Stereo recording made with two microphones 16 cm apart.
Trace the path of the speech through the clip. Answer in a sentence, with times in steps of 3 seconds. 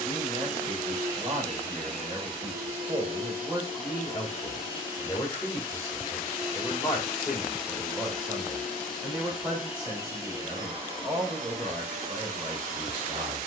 You can hear the speech on the right from 0 s, in the centre from 3 s and on the right from 9 s.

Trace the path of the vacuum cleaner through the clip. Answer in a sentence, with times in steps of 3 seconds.
You can hear the vacuum cleaner on the right from 0 s, in the centre from 6 s and on the right from 9 s.